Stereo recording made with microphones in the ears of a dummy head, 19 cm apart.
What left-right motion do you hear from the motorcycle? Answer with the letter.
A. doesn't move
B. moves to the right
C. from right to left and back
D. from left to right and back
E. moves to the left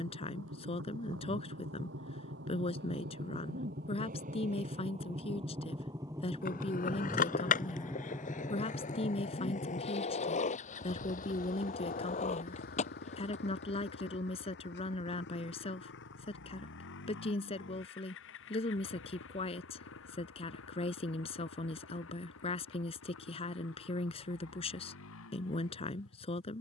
E.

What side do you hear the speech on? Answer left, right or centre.
left.